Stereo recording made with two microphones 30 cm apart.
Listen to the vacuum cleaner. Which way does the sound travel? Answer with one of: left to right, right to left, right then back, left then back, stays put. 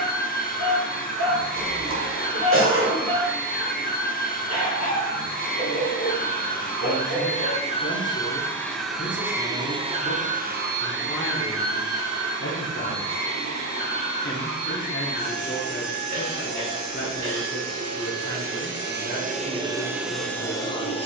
right then back.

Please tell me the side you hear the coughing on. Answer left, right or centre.
right.